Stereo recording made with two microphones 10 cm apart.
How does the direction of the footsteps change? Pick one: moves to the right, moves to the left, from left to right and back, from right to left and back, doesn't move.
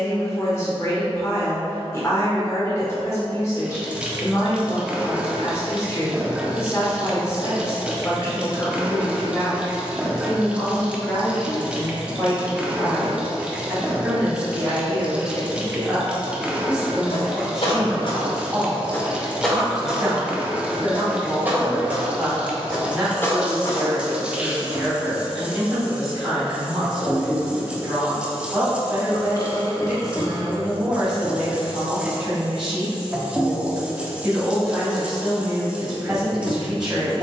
from left to right and back.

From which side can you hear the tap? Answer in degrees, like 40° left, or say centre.
10° right.